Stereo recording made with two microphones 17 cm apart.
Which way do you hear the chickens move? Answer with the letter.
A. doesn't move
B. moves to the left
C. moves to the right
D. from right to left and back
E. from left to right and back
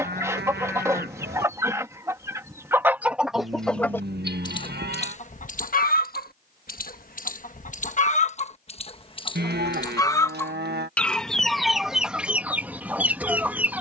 D.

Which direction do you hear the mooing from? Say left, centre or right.
right.